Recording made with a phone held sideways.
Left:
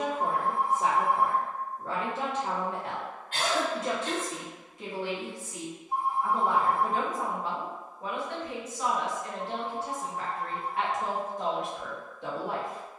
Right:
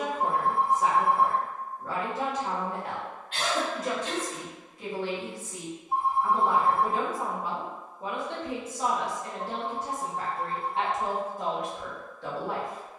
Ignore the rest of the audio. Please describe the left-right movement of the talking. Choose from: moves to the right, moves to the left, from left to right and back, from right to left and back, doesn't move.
from left to right and back.